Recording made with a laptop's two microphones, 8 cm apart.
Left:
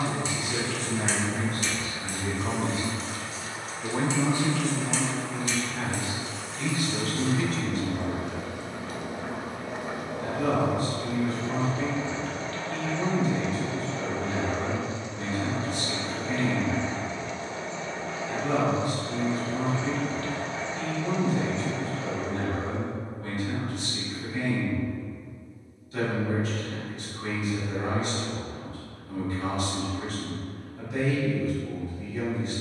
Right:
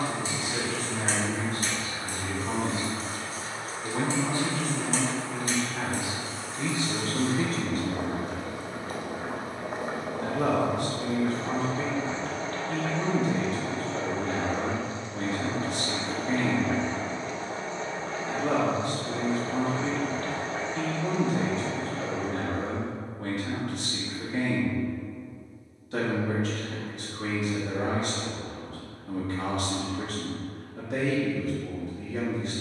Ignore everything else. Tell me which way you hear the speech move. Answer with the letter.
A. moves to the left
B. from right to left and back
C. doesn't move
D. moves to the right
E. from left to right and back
D.